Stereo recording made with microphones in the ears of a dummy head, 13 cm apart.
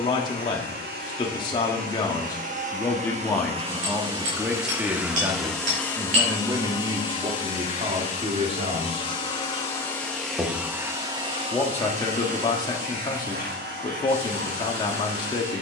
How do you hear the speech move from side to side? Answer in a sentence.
In this clip you hear the speech move from left to right and back again.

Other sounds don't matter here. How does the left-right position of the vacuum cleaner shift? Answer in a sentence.
In this clip you hear the vacuum cleaner go left and come back.